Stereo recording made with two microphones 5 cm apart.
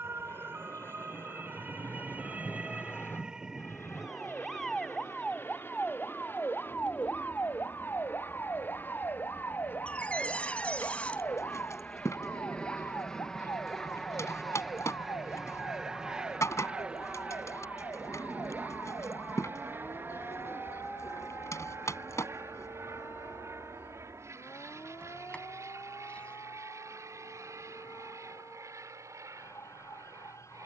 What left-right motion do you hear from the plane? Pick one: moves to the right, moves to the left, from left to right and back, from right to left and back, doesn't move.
moves to the right.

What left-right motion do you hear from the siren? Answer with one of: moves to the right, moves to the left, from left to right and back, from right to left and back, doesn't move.
moves to the left.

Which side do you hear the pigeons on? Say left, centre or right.
left.